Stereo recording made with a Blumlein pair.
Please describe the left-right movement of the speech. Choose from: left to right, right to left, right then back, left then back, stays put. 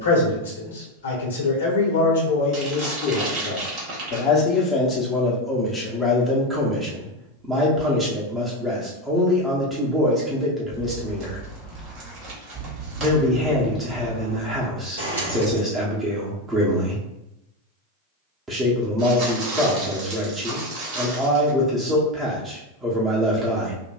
left to right.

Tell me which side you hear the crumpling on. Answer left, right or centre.
right.